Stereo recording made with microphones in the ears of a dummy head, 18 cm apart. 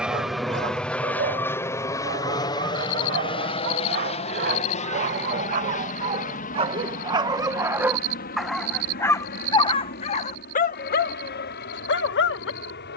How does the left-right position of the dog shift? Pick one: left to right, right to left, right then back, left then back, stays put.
right to left.